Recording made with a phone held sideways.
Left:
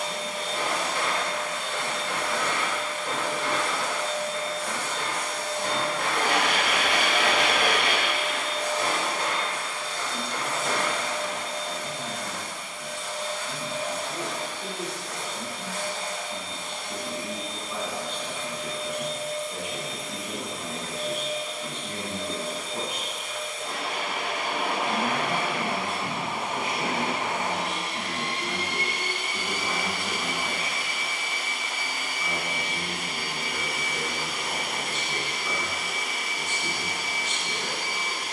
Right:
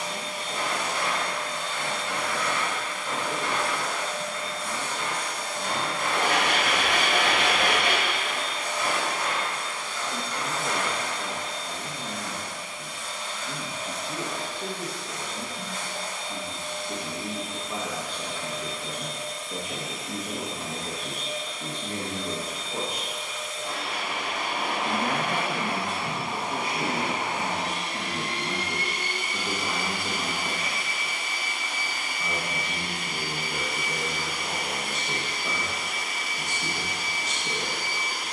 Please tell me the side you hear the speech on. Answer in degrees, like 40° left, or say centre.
40° right.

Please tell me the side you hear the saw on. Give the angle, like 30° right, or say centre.
30° right.